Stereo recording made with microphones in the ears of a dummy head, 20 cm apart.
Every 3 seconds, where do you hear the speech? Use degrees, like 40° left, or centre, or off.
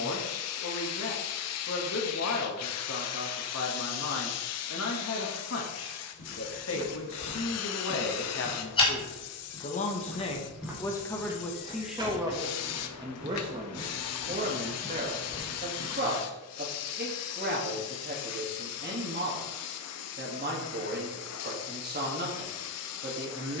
60° left, 60° left, 60° left, 20° left, 20° right, 40° right, 40° right, 40° right.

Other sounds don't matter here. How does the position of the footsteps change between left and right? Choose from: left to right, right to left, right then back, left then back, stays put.
right then back.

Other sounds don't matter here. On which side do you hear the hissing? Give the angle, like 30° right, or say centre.
80° left.